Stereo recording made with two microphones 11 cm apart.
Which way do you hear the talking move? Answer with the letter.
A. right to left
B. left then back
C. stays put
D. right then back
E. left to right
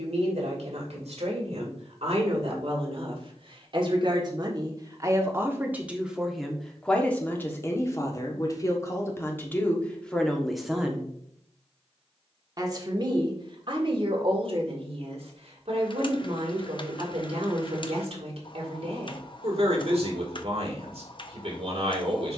B.